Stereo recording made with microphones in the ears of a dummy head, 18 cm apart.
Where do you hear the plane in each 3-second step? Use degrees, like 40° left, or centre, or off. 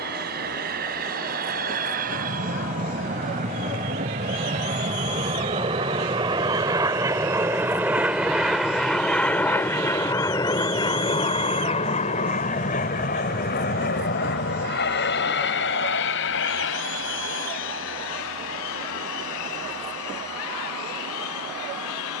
50° right, 40° right, 10° right, 20° left, 40° left, 60° left, 70° left, 70° left.